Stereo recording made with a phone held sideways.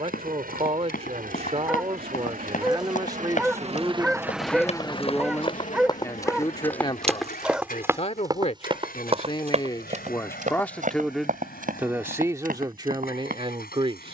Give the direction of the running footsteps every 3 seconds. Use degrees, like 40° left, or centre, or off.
70° left, 40° left, 10° right, 60° right, 70° right.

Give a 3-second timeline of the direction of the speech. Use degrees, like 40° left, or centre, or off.
40° right, 10° right, 40° left, 20° left, 30° right.